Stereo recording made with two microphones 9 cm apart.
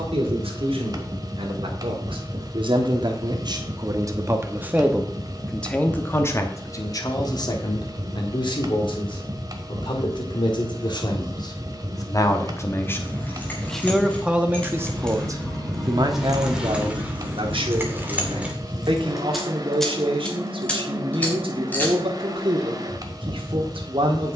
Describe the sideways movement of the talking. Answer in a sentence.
In this clip you hear the talking move from right to left and back again.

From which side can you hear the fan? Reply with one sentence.
In this clip you hear the fan on the right.